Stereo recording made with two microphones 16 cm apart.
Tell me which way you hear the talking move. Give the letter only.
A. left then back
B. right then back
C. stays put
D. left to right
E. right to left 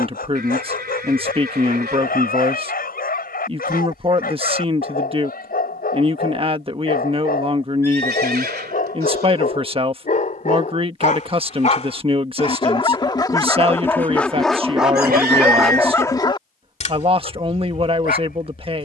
C.